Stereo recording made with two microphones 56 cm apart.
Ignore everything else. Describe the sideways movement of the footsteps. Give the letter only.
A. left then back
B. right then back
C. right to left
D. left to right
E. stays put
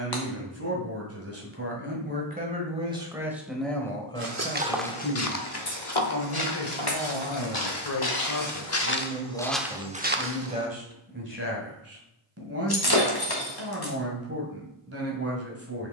A.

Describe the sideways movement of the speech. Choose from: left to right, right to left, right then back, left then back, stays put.
left then back.